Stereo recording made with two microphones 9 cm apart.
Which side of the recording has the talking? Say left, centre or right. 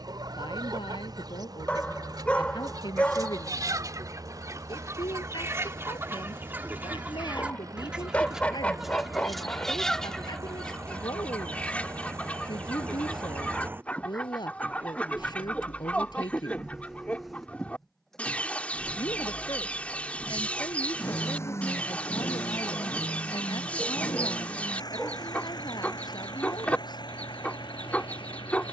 left.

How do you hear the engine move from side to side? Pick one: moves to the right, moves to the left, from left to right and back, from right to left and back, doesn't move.
moves to the left.